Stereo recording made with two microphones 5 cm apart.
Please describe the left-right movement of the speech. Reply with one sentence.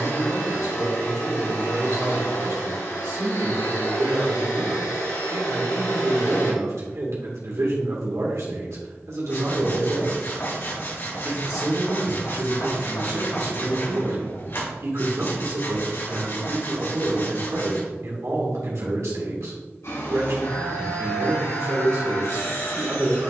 You can hear the speech stay put.